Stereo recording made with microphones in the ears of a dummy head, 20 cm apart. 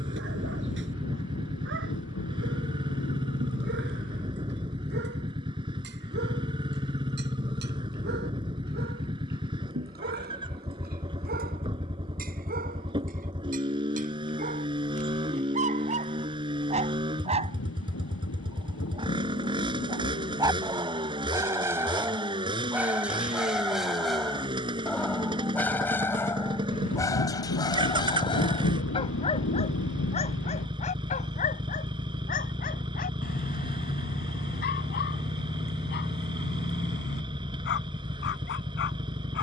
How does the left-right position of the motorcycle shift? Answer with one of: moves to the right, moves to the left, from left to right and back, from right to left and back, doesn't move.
doesn't move.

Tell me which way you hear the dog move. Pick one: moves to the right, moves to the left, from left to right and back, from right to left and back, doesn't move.
moves to the left.